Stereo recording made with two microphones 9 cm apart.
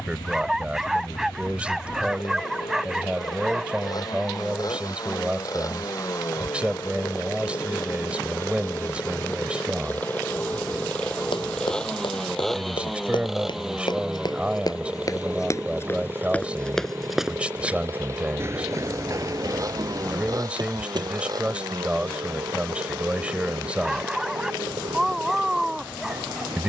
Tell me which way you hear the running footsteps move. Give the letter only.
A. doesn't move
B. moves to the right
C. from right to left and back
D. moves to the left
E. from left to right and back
B.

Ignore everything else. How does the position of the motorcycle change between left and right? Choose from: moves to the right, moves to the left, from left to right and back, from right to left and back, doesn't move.
moves to the right.